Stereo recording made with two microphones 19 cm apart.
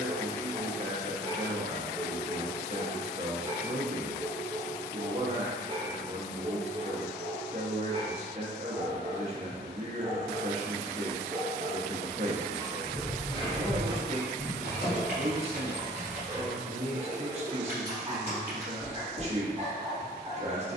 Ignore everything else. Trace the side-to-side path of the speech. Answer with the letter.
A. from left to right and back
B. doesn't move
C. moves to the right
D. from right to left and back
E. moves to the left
B.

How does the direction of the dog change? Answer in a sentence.
In this clip you hear the dog stay put.